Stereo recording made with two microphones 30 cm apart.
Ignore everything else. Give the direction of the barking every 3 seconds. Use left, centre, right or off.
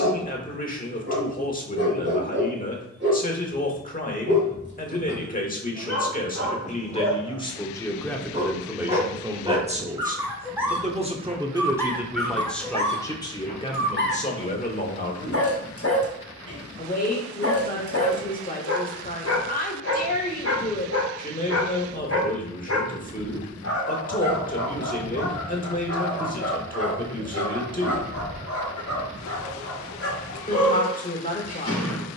right, right, right, centre, left, left, left, left, left, left, left.